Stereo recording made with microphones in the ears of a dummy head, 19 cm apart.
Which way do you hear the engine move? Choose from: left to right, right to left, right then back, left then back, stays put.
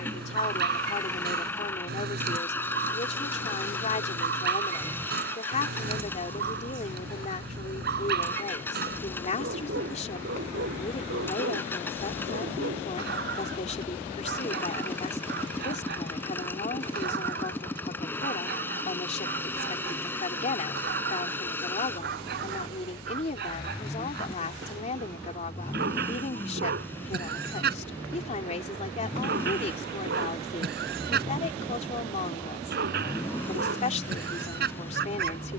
stays put.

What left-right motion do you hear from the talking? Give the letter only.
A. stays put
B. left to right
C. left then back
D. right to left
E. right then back
A.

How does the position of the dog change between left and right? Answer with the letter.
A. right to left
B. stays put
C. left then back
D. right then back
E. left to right
B.